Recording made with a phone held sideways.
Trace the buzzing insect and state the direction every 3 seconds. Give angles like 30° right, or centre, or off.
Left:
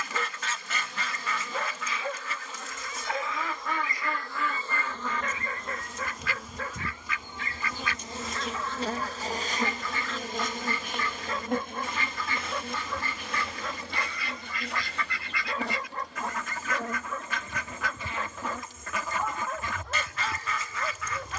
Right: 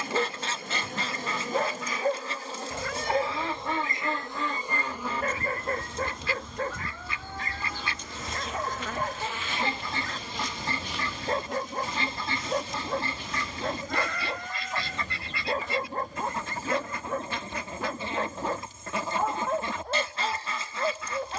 40° right, 20° right, 20° left, 40° left, 60° left, 70° left, 70° left.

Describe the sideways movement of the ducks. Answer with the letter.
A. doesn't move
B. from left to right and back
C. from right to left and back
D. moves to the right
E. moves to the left
A.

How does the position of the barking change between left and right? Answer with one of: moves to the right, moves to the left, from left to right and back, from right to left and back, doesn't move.
doesn't move.